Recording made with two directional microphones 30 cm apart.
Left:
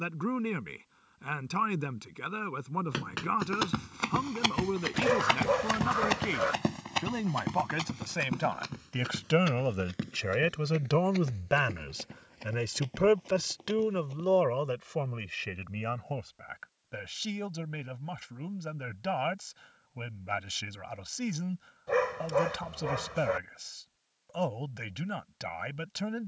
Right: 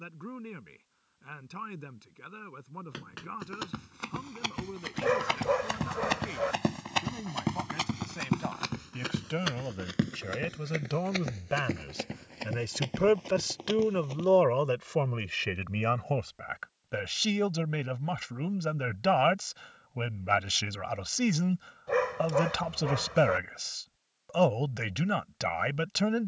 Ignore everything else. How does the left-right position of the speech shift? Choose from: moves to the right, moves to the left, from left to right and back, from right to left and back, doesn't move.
moves to the right.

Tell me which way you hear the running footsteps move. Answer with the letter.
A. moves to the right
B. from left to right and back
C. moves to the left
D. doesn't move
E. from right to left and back
A.